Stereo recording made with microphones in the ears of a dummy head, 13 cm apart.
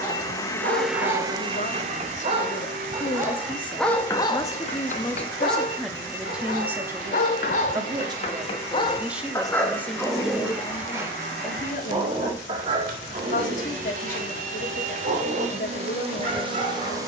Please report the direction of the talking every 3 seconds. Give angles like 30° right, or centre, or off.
50° left, 20° left, 20° right, 30° left, 60° left, 60° left.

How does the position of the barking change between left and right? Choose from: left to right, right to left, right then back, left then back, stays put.
left then back.